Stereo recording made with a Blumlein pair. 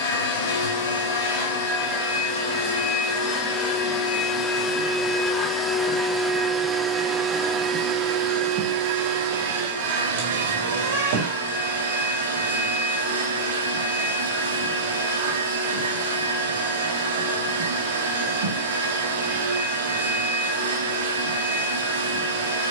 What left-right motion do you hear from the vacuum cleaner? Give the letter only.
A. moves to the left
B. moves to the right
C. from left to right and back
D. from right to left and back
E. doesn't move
B.